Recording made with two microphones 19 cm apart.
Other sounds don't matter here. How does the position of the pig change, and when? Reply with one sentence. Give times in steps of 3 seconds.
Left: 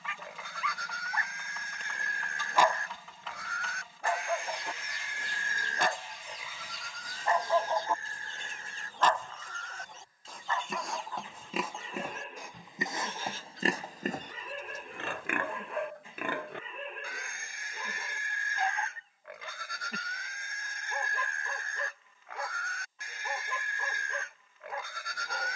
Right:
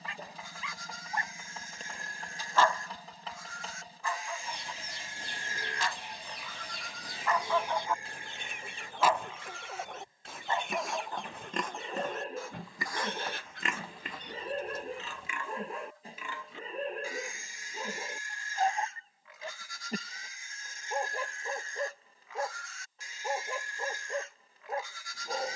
You can hear the pig on the left from 0 s, in the centre from 6 s and on the left from 12 s.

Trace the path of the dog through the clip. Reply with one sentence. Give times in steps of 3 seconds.
In this clip you hear the dog in the centre from 0 s, on the left from 3 s and on the right from 9 s.